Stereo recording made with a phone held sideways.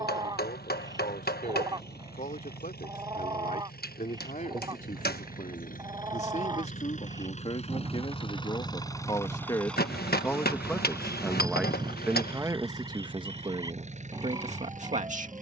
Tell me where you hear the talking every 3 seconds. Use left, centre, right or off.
left, left, left, centre, right.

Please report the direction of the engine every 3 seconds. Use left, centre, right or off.
left, left, left, centre, right.